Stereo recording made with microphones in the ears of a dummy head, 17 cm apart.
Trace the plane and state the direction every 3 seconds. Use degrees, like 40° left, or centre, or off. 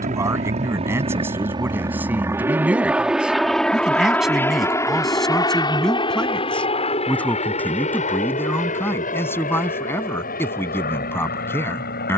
20° right, 10° left, 30° left, 40° left.